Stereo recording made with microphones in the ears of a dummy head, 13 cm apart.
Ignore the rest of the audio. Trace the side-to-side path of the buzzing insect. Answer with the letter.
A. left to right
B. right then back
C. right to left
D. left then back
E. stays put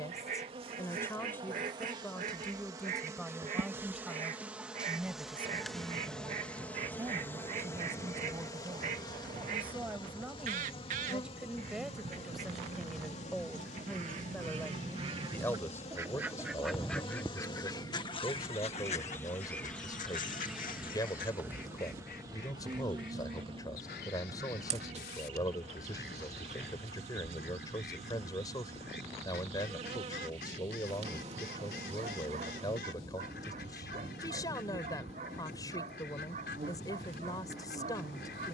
D.